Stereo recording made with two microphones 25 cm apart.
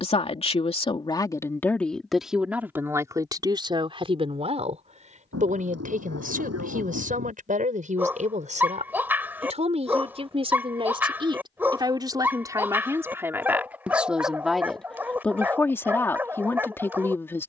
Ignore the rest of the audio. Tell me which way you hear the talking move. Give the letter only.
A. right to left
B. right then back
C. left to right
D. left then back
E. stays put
B.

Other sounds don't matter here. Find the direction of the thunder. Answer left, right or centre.
right.